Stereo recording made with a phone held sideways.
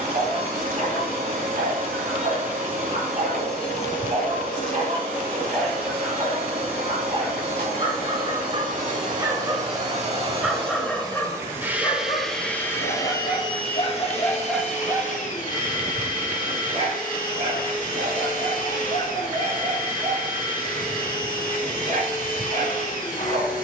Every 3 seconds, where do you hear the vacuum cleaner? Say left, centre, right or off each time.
right, right, right, right, left, left, left, left.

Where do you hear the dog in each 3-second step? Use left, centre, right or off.
right, right, right, centre, left, right, right, right.